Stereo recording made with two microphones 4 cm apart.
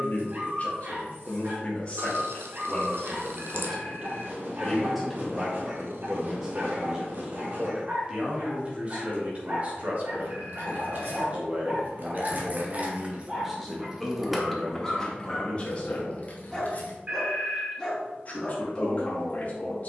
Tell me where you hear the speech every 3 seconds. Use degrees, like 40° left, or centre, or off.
30° left, 10° left, 20° right, 40° right, centre, 30° left, 40° left.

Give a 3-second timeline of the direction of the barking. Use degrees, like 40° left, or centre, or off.
50° right, 50° right, 50° right, 40° right, 20° right, 10° left, 20° left.